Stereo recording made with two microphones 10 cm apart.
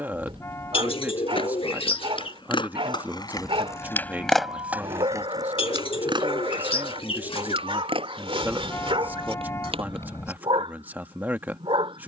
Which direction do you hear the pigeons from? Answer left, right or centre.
left.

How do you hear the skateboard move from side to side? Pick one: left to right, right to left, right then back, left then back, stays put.
left to right.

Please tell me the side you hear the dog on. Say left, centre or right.
right.